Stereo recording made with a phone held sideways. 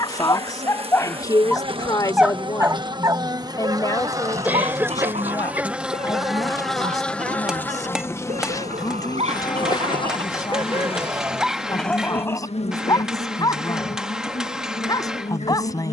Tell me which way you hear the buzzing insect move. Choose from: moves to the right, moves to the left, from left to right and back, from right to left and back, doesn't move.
moves to the left.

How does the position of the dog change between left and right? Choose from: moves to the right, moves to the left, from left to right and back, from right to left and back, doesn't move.
from left to right and back.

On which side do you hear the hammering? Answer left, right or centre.
centre.